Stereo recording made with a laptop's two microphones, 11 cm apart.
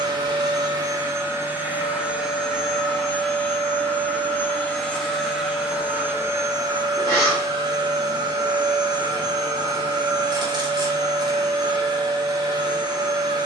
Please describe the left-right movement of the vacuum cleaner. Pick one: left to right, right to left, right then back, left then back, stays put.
left then back.